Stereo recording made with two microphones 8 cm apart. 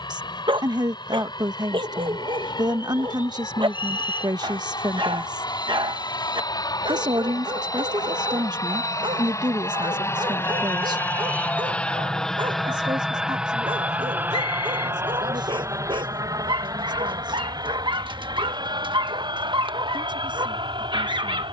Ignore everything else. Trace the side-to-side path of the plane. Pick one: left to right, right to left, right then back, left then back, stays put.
left to right.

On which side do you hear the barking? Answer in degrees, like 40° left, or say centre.
80° right.